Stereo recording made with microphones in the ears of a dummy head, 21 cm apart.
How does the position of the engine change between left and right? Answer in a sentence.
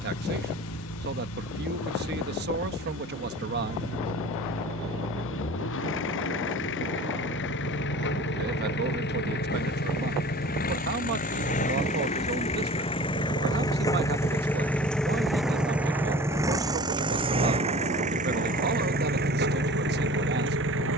You can hear the engine travel towards the right.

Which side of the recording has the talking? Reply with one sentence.
You can hear the talking on the right.